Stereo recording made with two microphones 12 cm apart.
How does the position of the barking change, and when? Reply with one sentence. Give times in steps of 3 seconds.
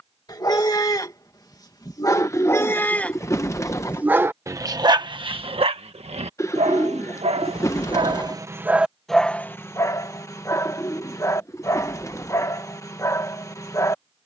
In this clip you hear the barking on the left from 0 s, on the right from 3 s and on the left from 9 s.